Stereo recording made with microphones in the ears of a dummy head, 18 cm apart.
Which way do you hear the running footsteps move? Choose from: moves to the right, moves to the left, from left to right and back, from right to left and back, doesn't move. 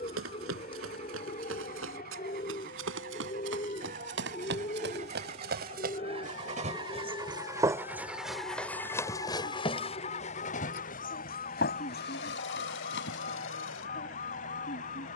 moves to the left.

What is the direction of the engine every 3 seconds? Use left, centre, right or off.
right, right, centre, left, left.